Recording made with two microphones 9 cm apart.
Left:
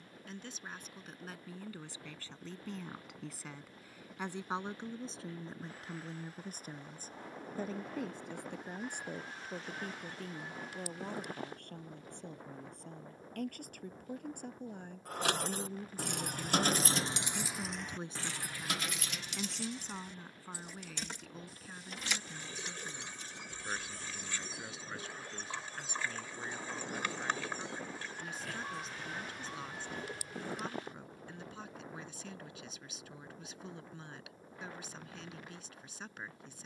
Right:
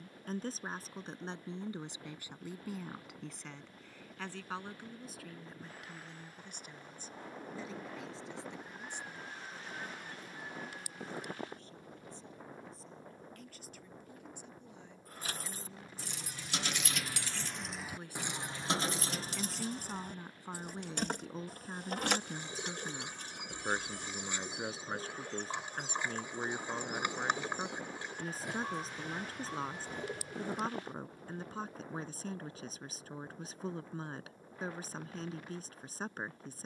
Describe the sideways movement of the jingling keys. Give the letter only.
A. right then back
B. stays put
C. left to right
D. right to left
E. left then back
C.